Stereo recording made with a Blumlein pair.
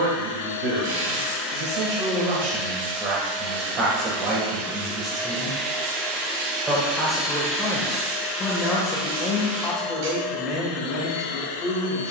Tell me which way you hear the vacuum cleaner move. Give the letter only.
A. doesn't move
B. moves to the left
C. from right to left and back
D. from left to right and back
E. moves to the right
D.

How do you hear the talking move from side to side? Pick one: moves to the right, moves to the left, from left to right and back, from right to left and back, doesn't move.
moves to the left.